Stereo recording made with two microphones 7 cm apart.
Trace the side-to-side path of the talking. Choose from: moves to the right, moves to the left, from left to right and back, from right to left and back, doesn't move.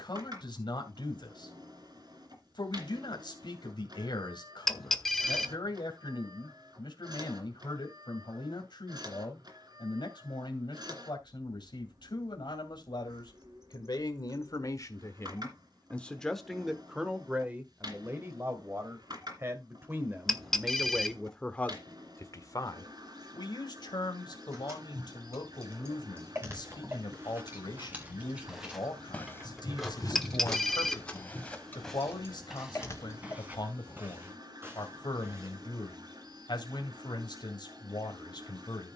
from left to right and back.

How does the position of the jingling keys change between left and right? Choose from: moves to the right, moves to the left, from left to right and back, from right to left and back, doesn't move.
moves to the left.